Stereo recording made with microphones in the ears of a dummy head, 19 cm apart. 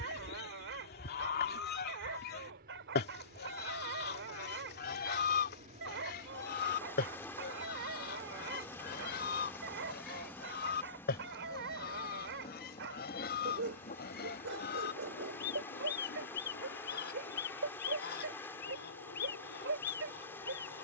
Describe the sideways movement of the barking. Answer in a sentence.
In this clip you hear the barking stay in one place.